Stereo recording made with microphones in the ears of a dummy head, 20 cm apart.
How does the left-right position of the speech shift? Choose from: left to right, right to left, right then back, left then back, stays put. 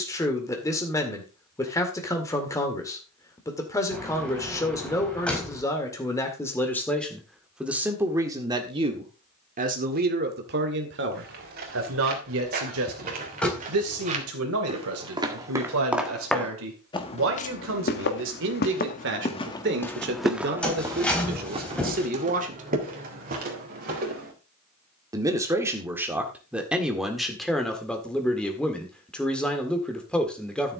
right then back.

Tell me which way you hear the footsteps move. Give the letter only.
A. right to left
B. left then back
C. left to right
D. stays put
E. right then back
B.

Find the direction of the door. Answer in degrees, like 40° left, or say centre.
centre.